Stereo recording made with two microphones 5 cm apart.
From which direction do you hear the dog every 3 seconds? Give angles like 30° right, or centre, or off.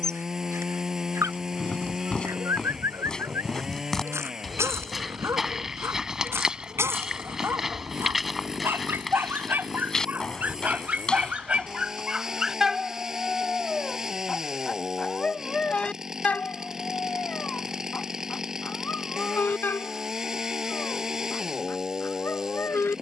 80° right, 70° right, 60° right, 30° right, centre, 30° left, 40° left, 50° left.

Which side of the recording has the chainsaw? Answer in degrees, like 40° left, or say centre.
10° right.